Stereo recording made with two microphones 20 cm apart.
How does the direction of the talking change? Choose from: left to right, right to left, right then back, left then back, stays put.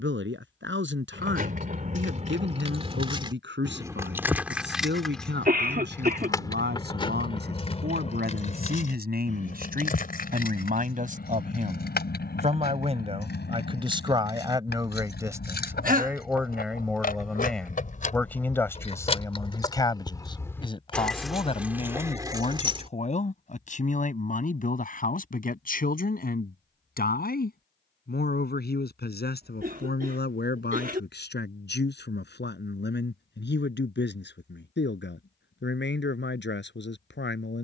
right to left.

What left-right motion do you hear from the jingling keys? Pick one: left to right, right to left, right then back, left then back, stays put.
left then back.